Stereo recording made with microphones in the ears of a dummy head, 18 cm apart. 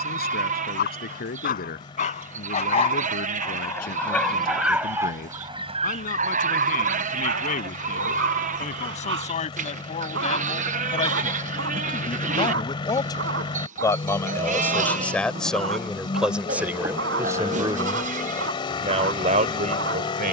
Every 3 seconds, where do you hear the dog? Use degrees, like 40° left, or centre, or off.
40° left, 10° right, 50° right, 60° right, 60° right, 60° right, 60° right.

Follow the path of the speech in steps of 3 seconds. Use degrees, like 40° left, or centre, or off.
50° left, 50° left, 40° left, 30° left, 20° left, 10° right, 40° right.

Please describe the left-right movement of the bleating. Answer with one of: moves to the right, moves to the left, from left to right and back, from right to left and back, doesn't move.
doesn't move.